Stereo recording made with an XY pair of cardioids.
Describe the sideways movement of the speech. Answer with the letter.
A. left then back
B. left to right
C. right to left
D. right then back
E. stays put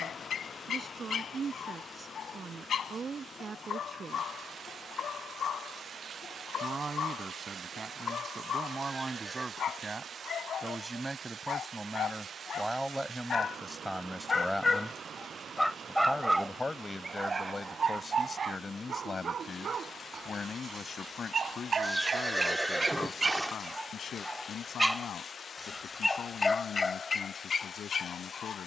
C.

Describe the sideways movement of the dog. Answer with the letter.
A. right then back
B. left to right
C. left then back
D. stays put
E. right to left
A.